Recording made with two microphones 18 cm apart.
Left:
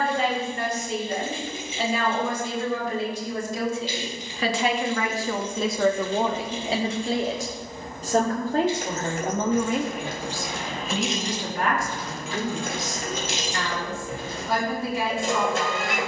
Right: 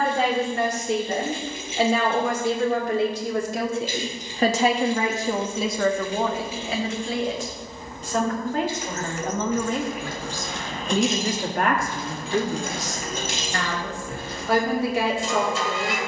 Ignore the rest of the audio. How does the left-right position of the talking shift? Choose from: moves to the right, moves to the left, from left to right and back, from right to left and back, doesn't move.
from right to left and back.